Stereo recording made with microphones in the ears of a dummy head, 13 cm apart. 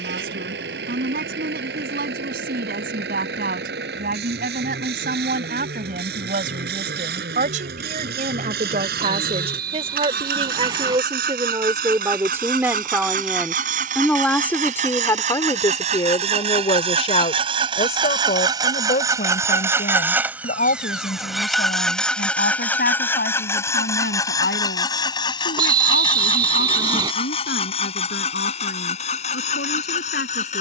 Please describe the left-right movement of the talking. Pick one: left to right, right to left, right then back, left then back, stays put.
right to left.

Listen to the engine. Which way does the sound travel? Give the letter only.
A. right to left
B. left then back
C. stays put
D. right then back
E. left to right
A.